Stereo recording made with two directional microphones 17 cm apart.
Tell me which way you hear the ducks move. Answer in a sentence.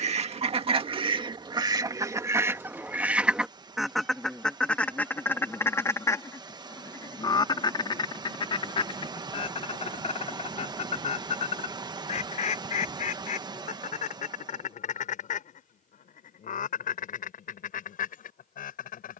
In this clip you hear the ducks move from right to left.